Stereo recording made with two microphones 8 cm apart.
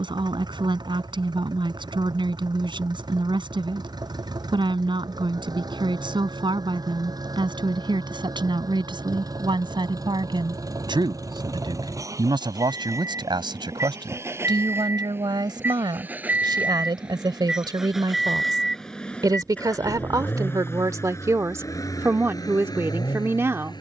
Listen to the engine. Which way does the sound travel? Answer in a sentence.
In this clip you hear the engine travel towards the left.